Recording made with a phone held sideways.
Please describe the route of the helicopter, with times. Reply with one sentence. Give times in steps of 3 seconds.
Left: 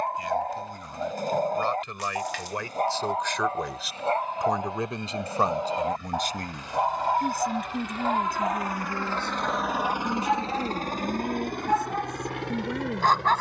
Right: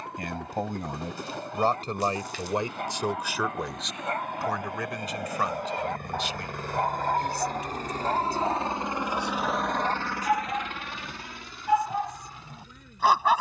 In this clip you hear the helicopter on the right from 0 s and on the left from 9 s.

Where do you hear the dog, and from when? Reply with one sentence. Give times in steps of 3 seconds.
In this clip you hear the dog on the left from 0 s and in the centre from 6 s.